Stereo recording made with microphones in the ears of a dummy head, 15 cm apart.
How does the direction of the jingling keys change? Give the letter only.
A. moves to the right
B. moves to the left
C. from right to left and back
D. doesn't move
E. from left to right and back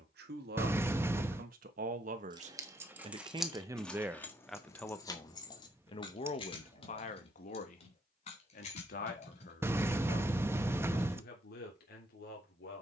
B.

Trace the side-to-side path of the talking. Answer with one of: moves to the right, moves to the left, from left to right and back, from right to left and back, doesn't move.
moves to the left.